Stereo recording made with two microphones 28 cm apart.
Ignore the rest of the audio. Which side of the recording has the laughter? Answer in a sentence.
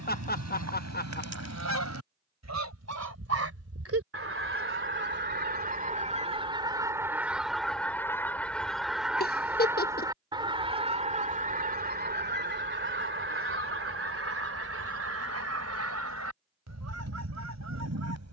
You can hear the laughter on the left.